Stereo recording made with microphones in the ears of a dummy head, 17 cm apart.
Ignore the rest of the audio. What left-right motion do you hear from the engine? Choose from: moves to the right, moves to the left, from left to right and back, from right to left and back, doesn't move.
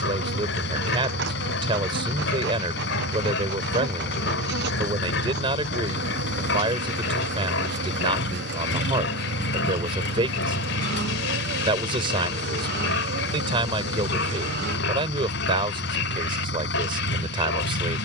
doesn't move.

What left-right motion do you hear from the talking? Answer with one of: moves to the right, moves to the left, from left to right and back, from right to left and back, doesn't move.
doesn't move.